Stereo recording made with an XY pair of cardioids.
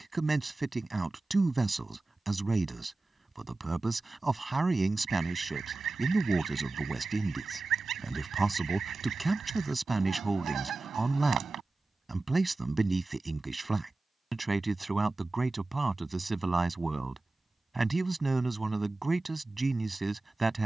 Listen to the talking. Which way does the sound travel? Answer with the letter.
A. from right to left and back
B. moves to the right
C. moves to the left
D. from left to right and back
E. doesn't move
E.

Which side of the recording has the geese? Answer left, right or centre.
right.